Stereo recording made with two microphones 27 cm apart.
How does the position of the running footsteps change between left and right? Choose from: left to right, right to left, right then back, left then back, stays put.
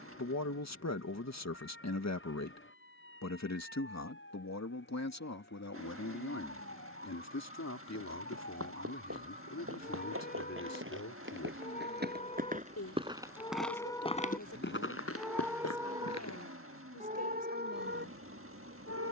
right to left.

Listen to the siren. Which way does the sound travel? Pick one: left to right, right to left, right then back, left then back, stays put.
left to right.